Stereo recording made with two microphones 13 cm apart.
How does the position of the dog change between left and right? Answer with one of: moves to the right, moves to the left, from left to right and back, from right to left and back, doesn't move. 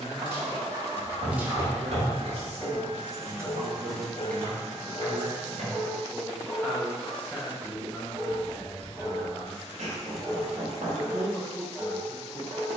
from right to left and back.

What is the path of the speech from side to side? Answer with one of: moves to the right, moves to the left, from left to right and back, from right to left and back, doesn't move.
moves to the left.